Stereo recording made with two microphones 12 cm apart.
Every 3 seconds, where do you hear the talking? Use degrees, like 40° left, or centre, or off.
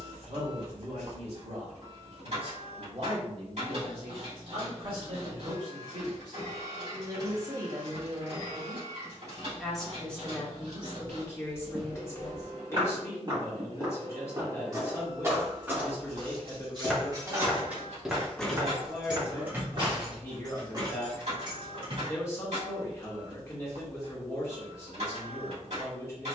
60° right, 50° right, 30° right, 10° left, 20° left, 20° left, 20° left, 20° left, 20° left.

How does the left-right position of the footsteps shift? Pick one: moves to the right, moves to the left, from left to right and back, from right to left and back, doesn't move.
from right to left and back.